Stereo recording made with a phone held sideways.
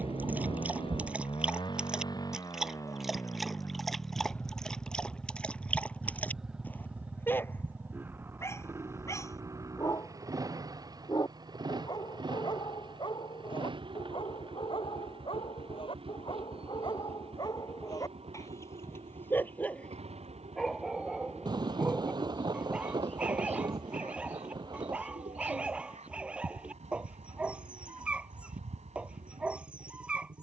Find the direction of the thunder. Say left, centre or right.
right.